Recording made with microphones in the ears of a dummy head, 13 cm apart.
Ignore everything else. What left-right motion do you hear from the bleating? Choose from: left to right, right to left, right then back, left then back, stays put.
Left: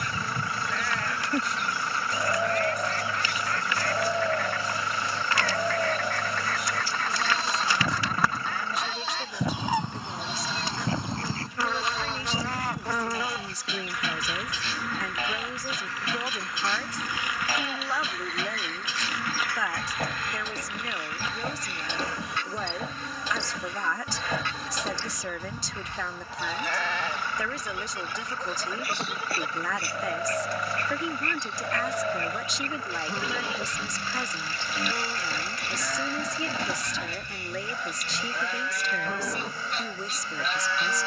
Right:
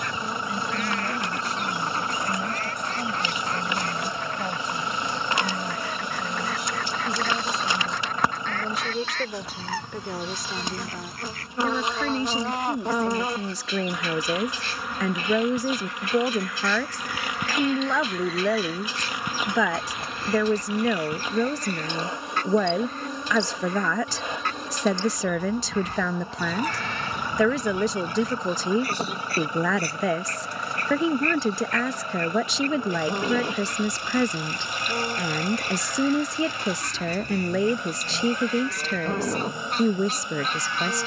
stays put.